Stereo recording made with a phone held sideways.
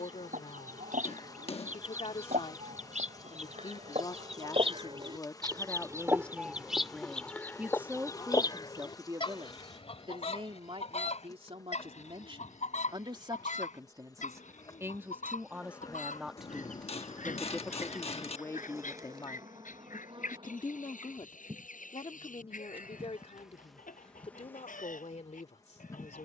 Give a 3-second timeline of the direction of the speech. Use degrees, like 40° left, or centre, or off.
50° left, 30° left, 10° right, 40° right, 30° right, centre, 30° left, 50° left, 60° left.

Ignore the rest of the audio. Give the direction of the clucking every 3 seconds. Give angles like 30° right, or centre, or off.
70° right, 40° right, 10° left, 50° left, 60° left, 70° left, 70° left, 80° left, 80° left.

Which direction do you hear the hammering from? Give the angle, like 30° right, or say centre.
50° left.